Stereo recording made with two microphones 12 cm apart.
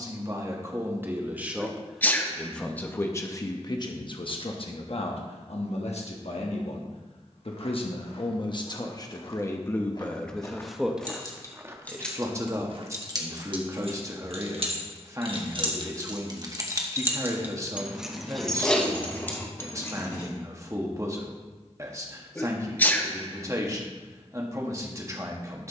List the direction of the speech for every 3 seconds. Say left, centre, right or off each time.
centre, left, left, centre, right, right, right, right, right.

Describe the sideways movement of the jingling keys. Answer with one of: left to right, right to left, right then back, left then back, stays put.
right then back.